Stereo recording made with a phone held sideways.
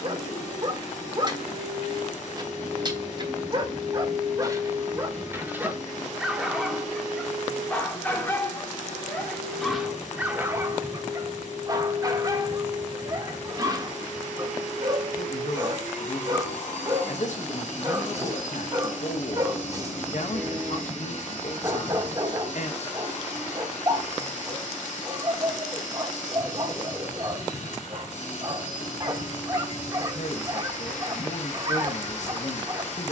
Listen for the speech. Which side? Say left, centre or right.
left.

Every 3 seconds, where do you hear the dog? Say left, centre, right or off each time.
right, right, centre, centre, right, right, right, right, right, right, right.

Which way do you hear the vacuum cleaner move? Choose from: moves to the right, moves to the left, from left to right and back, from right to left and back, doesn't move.
doesn't move.